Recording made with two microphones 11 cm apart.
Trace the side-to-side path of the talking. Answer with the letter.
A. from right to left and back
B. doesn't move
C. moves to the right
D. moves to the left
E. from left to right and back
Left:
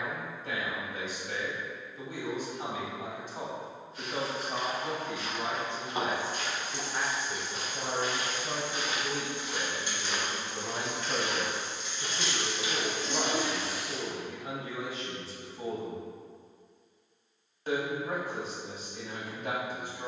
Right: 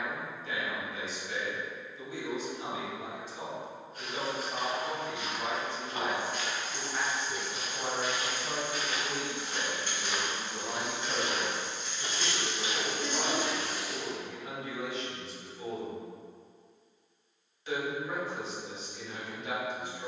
E.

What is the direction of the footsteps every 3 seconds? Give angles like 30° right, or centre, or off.
off, 30° right, 40° left, 10° right, 40° right, off, off.